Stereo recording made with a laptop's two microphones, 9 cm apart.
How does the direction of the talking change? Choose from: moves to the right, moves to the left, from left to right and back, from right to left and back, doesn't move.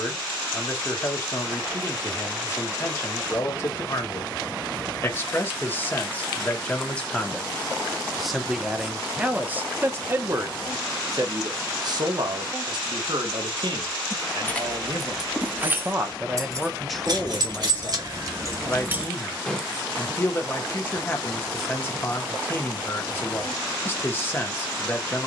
from left to right and back.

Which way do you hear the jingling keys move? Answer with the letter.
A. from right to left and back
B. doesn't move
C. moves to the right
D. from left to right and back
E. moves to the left
D.